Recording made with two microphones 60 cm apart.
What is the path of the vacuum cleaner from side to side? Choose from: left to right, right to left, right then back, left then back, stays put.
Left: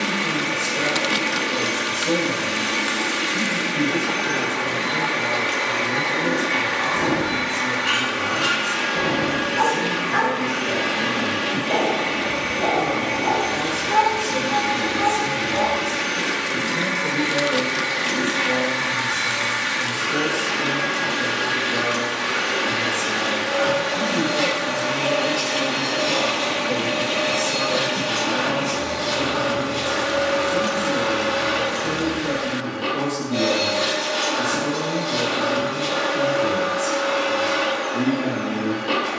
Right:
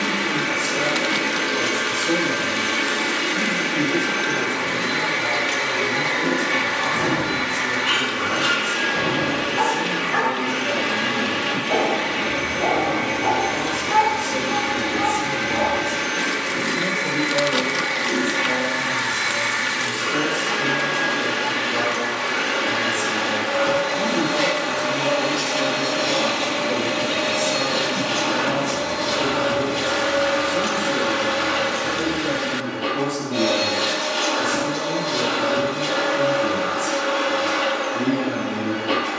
right to left.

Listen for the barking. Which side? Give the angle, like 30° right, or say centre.
centre.